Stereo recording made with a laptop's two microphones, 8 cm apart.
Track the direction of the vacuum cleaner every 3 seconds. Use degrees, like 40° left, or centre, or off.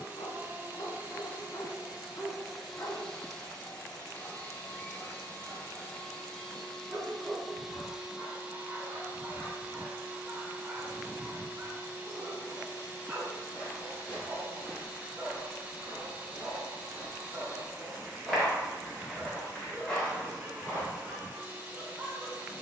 20° right, 20° left, centre, 20° right, 20° right, 20° right, 20° right, 20° right.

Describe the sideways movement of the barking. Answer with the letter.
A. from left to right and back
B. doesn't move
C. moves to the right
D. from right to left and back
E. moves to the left
C.